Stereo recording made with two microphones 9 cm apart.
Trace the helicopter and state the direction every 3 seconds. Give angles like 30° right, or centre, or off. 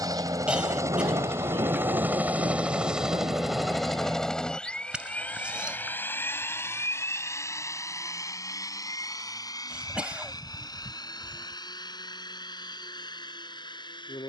30° right, 10° left, 30° left, 40° left, 50° left.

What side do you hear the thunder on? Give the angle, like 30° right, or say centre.
60° right.